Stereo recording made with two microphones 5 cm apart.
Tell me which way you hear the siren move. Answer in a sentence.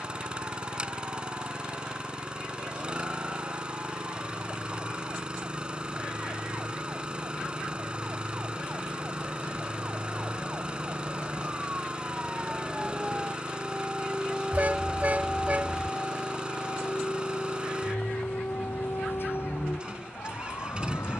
In this clip you hear the siren move from right to left.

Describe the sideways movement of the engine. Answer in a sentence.
You can hear the engine stay in one place.